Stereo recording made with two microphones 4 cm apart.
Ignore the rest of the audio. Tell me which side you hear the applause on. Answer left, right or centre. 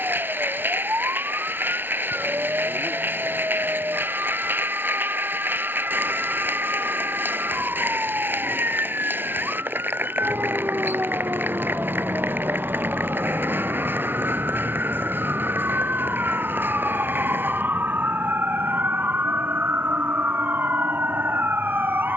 right.